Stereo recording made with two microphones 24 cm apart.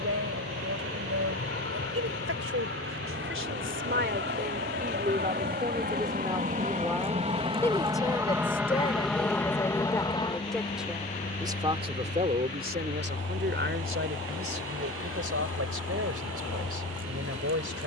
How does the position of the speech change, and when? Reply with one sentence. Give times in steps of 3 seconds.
In this clip you hear the speech on the right from 0 s, in the centre from 6 s and on the right from 12 s.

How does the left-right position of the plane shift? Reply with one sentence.
You can hear the plane move from right to left.